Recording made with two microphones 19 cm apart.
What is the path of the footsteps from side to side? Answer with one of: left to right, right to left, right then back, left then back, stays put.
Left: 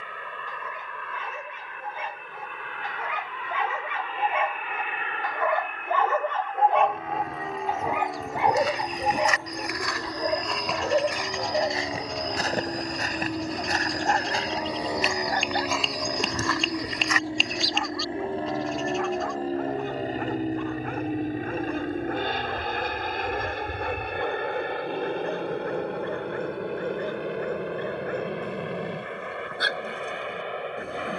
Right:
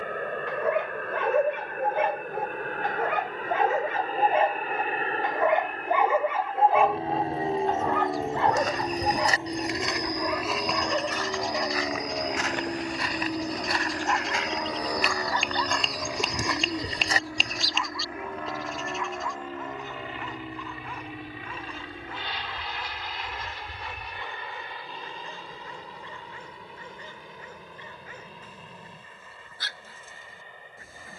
left then back.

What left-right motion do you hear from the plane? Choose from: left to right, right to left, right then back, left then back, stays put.
right to left.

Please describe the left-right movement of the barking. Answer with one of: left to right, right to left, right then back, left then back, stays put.
right to left.